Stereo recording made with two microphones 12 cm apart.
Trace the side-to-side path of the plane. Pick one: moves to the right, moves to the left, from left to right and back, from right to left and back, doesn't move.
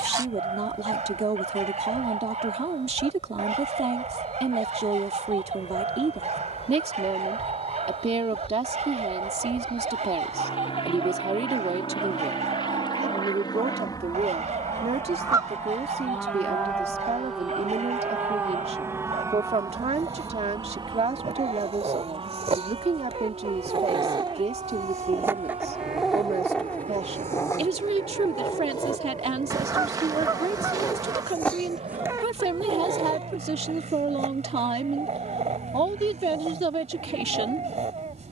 moves to the right.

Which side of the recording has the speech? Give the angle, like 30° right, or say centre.
60° right.